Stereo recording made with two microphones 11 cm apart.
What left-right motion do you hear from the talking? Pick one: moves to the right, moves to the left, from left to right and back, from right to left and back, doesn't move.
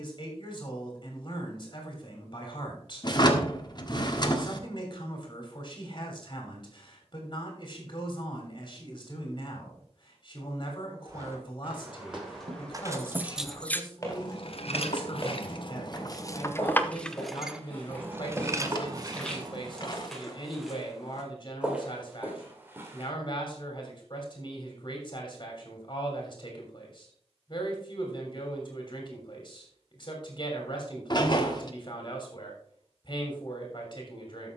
doesn't move.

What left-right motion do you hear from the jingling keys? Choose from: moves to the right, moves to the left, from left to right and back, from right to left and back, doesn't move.
from right to left and back.